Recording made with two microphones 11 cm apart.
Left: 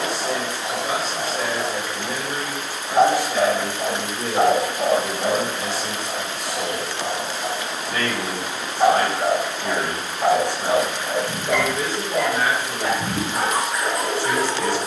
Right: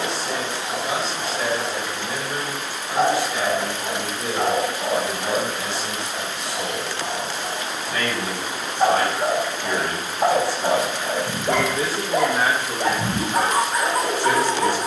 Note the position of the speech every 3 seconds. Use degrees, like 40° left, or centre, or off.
40° left, 40° left, 40° left, 10° left, 30° right.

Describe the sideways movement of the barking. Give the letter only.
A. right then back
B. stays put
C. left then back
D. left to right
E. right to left
D.